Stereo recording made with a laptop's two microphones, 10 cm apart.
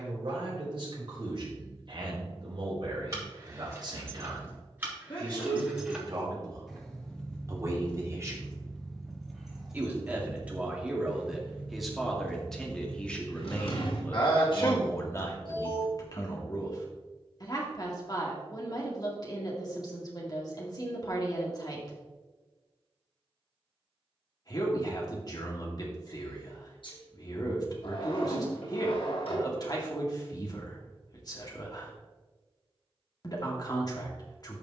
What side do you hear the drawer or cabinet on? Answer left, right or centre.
left.